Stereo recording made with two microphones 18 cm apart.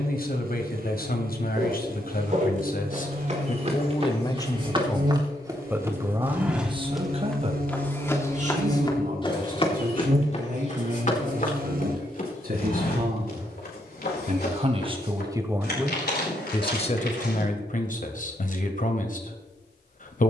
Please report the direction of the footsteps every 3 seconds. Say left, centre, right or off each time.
right, right, centre, left, left, left, off.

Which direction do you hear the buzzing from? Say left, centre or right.
right.